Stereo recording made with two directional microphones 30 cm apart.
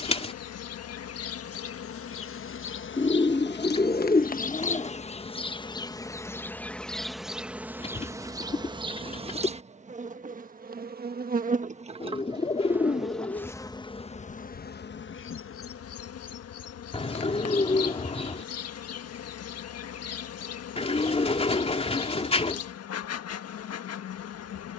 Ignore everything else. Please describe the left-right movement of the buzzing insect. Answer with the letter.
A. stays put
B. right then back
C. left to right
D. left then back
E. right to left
B.